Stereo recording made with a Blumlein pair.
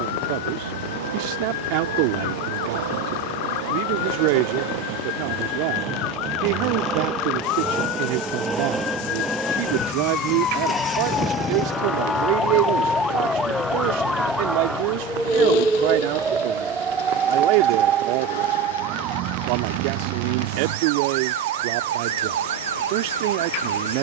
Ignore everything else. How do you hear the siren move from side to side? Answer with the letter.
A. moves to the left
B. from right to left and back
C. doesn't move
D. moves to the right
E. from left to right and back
D.